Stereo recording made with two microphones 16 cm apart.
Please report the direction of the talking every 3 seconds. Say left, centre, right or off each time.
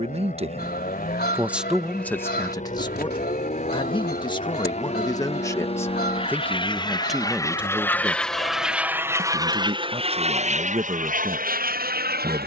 centre, left, centre, right.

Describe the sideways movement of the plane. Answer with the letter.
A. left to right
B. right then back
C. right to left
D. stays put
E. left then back
A.